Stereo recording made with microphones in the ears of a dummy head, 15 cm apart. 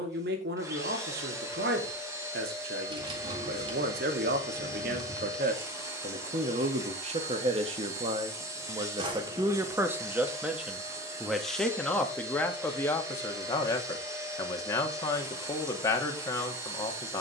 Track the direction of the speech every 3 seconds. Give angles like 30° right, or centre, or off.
70° right, 60° right, 40° right, 10° right, 20° left, 20° left.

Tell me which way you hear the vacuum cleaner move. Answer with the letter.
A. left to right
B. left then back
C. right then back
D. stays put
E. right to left
D.